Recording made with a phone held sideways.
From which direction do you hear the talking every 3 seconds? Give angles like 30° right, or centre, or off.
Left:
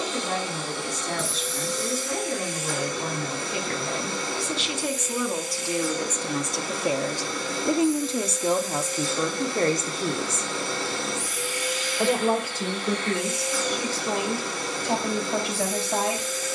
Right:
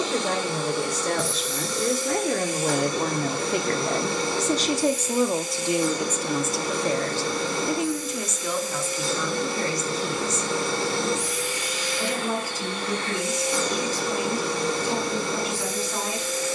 70° right, 40° right, 20° left, 50° left, 60° left, 70° left.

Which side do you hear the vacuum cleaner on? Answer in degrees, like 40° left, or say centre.
80° right.